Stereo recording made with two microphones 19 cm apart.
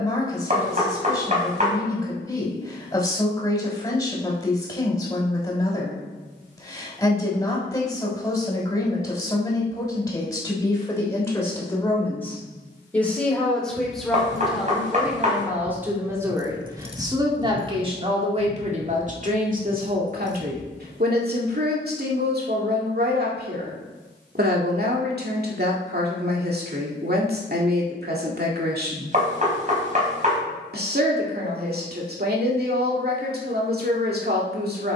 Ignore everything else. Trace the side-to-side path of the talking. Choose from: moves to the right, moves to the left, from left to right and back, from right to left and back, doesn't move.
moves to the right.